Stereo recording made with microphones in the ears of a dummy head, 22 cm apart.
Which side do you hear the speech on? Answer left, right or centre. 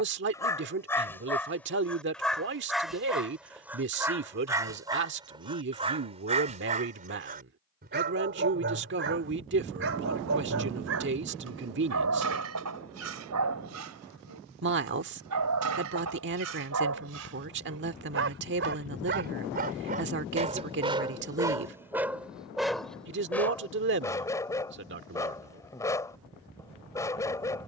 right.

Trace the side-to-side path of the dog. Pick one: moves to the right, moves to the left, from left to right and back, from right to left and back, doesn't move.
from left to right and back.